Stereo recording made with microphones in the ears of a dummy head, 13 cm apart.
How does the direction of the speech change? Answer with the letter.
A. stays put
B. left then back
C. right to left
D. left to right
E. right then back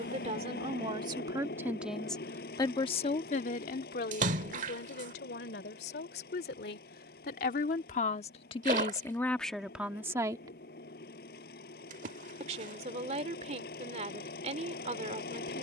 B.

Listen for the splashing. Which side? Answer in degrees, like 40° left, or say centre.
50° right.